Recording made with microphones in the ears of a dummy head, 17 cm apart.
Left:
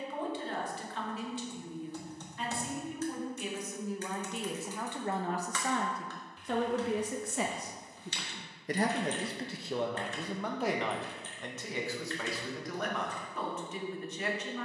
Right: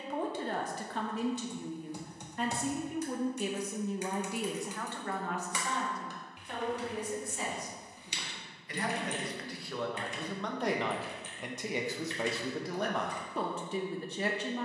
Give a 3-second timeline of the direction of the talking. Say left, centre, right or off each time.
right, centre, left, centre, right.